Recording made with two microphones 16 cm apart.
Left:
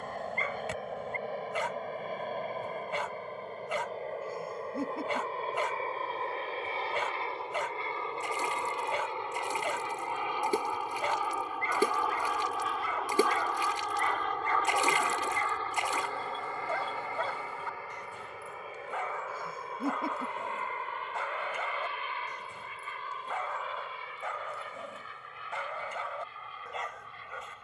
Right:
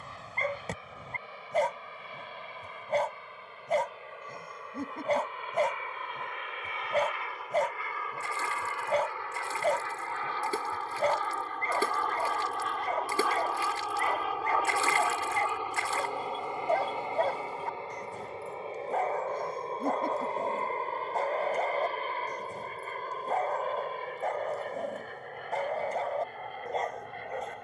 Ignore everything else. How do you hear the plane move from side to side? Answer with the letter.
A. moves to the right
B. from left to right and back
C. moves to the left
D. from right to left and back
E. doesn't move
A.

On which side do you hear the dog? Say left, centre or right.
right.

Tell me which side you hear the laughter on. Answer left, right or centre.
centre.